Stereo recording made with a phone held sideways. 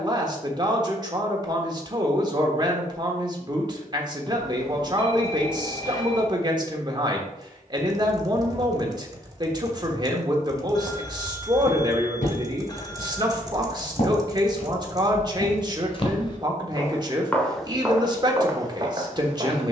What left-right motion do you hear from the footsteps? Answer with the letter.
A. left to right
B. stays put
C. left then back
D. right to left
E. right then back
A.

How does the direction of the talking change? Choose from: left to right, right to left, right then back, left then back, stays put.
stays put.